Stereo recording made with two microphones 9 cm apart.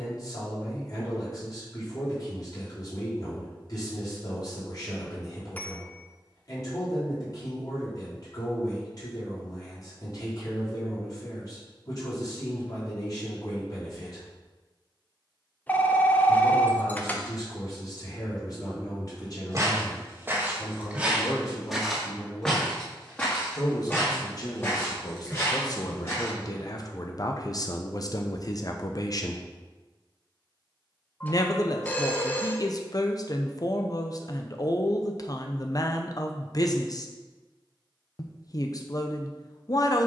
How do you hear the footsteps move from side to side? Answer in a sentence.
In this clip you hear the footsteps travel towards the left.